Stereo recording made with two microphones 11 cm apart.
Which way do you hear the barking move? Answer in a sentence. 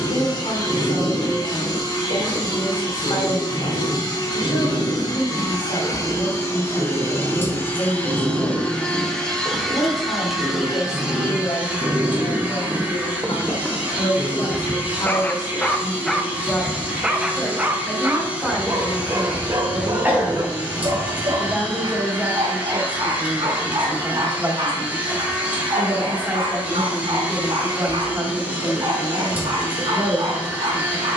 You can hear the barking go left and come back.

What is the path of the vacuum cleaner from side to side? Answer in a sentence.
You can hear the vacuum cleaner move to the right.